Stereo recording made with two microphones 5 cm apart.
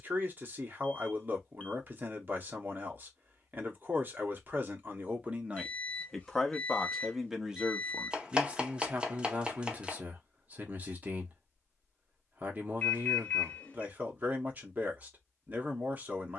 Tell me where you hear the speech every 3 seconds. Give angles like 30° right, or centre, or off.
40° right, 30° right, 10° right, 40° right, 40° right, 40° right.